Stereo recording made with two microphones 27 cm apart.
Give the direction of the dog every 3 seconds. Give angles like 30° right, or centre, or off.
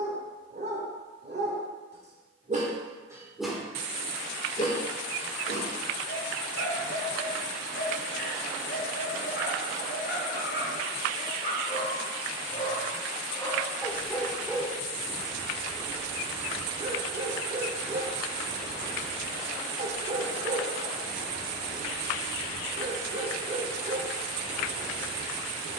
30° right, 20° left, 50° left, 40° left, 10° left, 20° right, 30° right, 30° right, 30° right.